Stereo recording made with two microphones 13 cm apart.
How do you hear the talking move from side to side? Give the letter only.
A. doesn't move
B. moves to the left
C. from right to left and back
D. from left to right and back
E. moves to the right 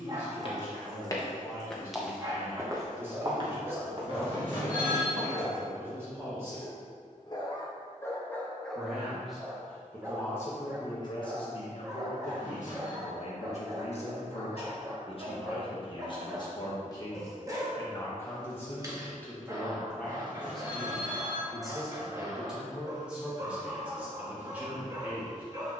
C.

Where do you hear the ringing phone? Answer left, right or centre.
right.